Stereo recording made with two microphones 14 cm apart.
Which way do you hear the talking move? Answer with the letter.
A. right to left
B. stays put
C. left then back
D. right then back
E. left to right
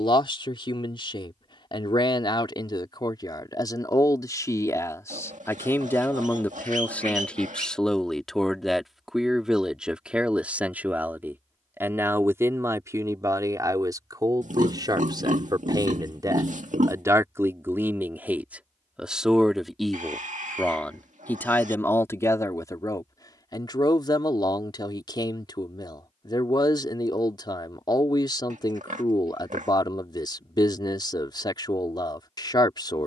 D.